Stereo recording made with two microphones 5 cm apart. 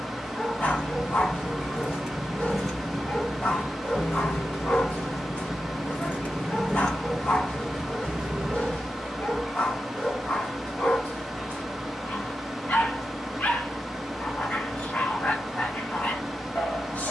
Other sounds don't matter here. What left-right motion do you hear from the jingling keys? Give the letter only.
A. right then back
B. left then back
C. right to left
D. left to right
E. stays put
B.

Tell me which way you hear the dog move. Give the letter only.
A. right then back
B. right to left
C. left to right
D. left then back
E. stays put
E.